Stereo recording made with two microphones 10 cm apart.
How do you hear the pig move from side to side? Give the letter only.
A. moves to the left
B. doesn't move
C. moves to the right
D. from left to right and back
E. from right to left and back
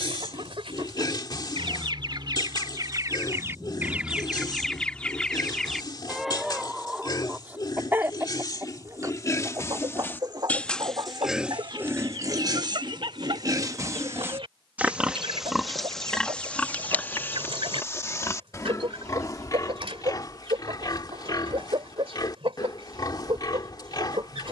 D.